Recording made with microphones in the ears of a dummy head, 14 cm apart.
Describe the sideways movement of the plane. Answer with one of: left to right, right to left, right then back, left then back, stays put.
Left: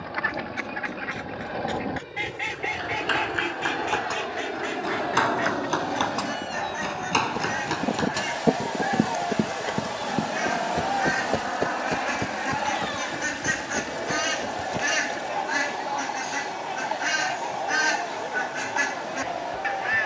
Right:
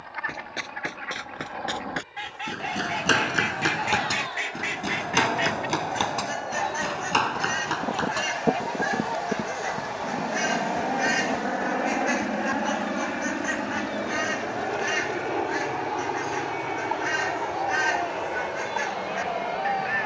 left to right.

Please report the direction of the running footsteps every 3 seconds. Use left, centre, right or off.
right, right, centre, left, left, off, off.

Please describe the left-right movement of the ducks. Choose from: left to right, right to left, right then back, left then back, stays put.
right then back.